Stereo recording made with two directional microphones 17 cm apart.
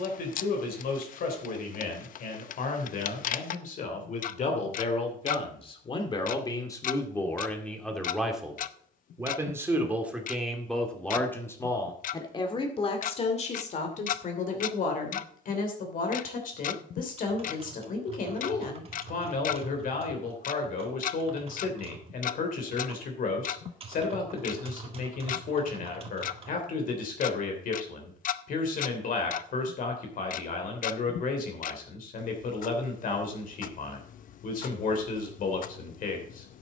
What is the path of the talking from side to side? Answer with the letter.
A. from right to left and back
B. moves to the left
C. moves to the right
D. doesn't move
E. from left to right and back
E.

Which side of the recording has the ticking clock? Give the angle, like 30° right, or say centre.
50° left.